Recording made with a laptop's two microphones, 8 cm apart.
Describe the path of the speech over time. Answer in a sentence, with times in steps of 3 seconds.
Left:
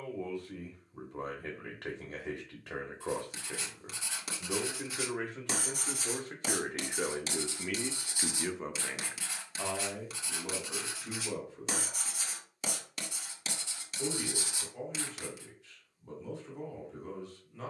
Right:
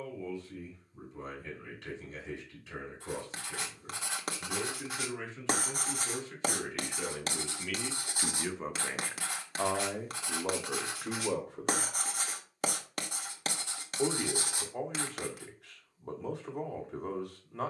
In this clip you hear the speech on the left from 0 s and on the right from 9 s.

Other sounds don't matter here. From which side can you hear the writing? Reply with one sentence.
In this clip you hear the writing on the right.